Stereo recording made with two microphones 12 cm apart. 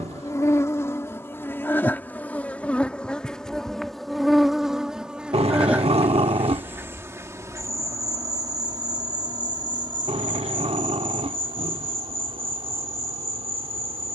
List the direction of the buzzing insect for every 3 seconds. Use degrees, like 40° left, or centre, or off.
20° left, centre, 30° right, 40° right, 60° right.